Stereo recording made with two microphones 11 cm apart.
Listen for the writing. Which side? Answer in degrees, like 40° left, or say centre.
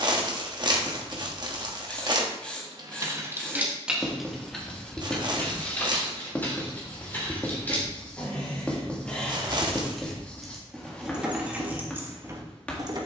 10° left.